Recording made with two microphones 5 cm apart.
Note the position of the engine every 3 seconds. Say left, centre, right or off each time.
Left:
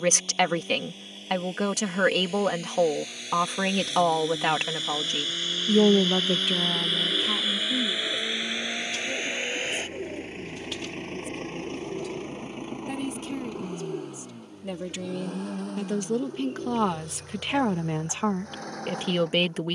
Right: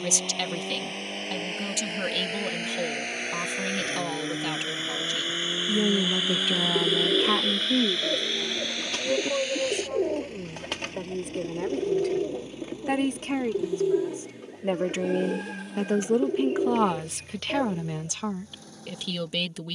right, right, centre, left, left, left, left.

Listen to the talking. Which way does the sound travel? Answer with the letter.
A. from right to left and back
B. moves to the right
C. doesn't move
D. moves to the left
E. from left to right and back
E.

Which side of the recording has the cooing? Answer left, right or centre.
right.